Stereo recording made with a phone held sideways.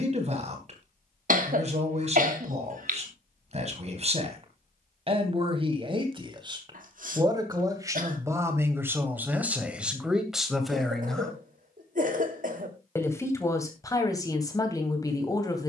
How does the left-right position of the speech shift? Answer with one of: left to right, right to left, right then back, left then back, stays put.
right to left.